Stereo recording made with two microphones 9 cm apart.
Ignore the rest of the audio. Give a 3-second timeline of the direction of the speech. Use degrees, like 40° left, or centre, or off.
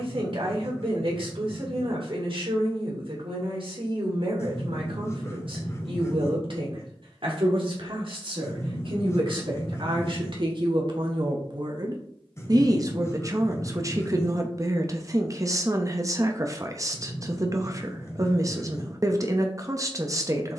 70° right, 70° right, 70° right, 60° right, 40° right, 40° right, 40° right.